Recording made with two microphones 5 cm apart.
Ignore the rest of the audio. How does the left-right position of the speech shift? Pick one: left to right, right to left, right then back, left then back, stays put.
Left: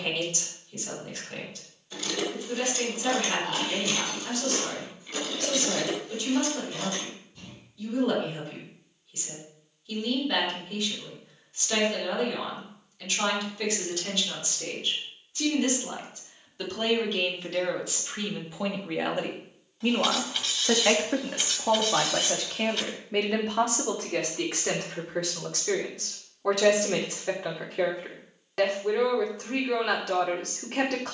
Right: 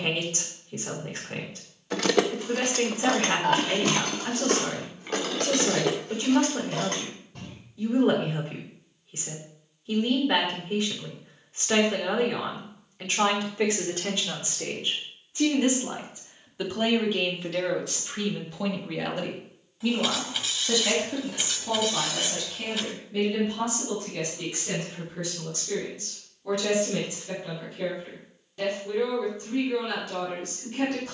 right to left.